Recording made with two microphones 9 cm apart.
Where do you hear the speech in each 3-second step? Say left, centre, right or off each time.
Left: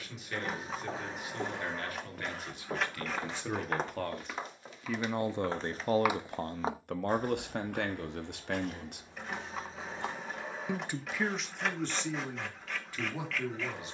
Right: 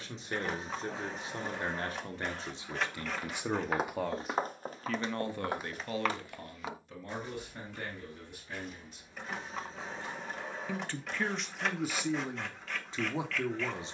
right, centre, left, centre, right.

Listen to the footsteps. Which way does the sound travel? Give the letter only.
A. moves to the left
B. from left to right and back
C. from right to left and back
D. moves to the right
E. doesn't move
B.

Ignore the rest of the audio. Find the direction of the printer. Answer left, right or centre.
centre.